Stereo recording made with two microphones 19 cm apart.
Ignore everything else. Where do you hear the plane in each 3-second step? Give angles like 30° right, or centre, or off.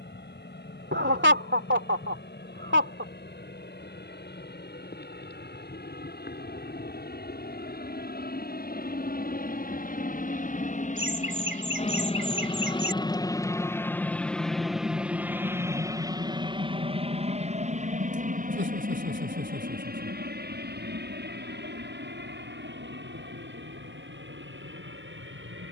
80° left, 70° left, 60° left, 50° left, 20° left, 20° right, 50° right, 60° right, 70° right.